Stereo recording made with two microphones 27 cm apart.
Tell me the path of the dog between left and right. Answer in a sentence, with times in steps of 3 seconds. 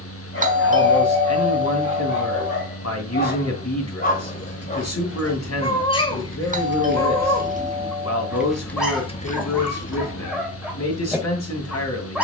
In this clip you hear the dog on the left from 0 s and in the centre from 6 s.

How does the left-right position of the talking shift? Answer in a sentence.
In this clip you hear the talking stay in one place.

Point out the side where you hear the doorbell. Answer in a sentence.
You can hear the doorbell on the right.